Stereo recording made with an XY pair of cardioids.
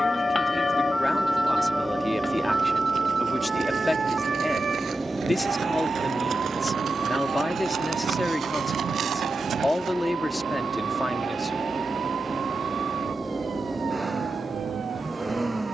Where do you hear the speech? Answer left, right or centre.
centre.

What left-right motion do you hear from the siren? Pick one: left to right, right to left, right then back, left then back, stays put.
left to right.